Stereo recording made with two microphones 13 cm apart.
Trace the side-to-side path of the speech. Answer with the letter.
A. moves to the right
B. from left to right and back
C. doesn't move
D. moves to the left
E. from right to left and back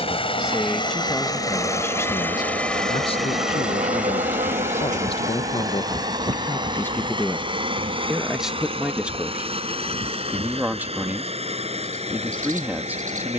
E.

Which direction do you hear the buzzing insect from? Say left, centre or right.
right.